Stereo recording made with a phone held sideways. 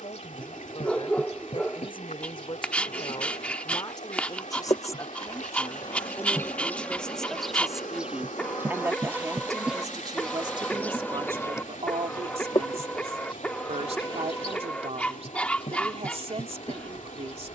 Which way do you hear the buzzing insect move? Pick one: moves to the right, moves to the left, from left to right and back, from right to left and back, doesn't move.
from left to right and back.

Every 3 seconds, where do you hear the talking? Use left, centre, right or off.
left, left, centre, right, right, right.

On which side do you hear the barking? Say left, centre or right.
centre.